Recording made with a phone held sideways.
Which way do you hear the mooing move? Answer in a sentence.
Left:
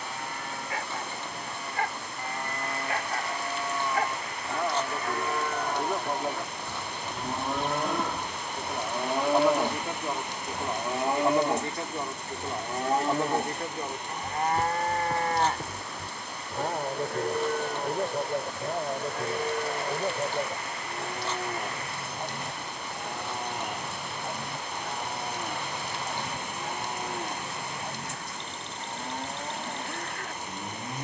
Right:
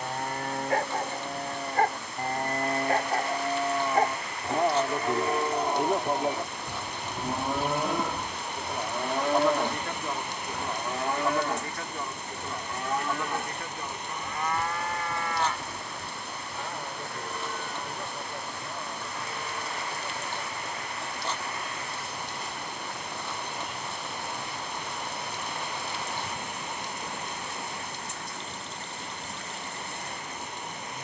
You can hear the mooing move from right to left.